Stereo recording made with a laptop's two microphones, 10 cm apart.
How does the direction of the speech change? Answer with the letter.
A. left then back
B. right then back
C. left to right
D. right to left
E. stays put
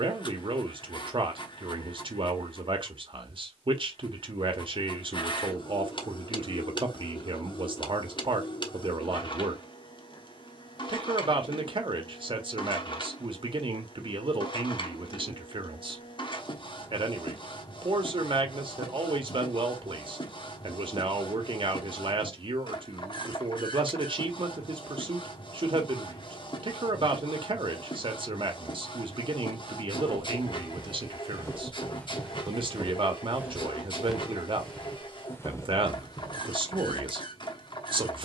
E.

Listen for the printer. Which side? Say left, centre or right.
left.